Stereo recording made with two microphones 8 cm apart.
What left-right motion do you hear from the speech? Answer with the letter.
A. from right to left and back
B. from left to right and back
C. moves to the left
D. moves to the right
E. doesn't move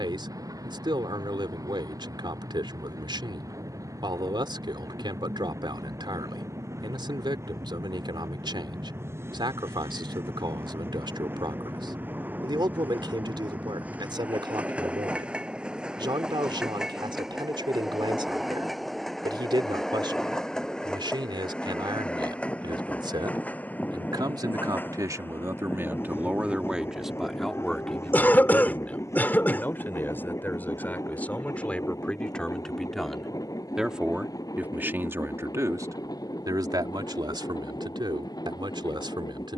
A.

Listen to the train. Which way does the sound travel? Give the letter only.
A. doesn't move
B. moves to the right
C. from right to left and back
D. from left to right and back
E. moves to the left
E.